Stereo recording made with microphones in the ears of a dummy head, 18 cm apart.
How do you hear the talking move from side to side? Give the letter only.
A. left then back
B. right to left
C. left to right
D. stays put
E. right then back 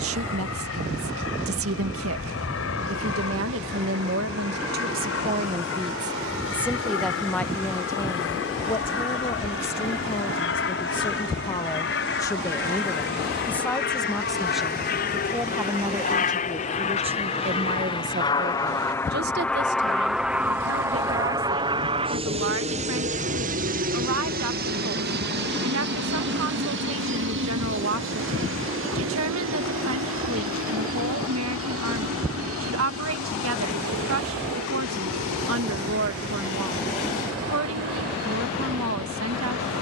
A.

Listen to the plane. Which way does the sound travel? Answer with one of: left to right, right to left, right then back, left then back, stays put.
left to right.